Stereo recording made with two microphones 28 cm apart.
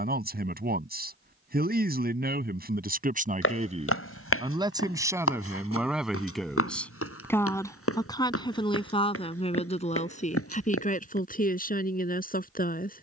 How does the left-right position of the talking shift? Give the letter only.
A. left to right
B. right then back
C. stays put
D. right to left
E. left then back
D.